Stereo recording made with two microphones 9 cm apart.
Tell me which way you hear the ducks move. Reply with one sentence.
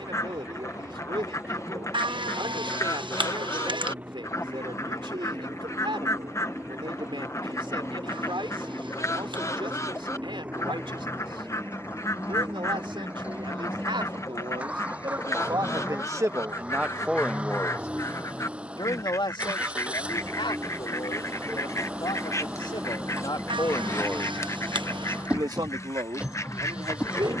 You can hear the ducks stay in one place.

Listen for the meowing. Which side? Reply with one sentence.
You can hear the meowing on the right.